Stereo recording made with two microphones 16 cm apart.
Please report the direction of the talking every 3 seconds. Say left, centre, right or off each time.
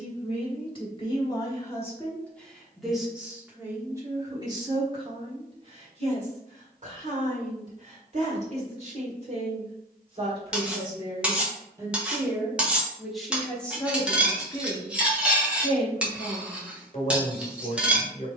left, right, right, right, centre, left.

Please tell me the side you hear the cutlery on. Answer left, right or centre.
centre.